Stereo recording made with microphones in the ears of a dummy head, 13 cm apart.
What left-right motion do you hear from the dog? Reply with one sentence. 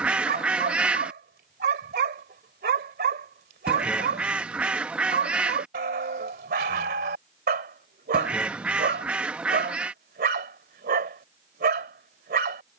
You can hear the dog stay in one place.